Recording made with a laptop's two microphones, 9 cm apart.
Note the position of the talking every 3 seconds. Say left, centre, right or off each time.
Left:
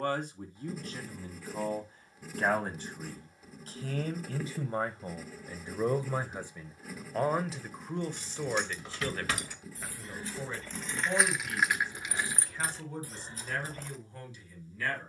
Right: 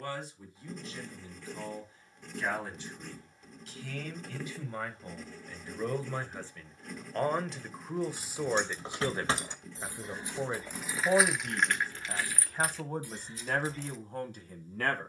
left, left, centre, right, right.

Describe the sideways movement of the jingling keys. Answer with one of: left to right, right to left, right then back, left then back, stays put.
right to left.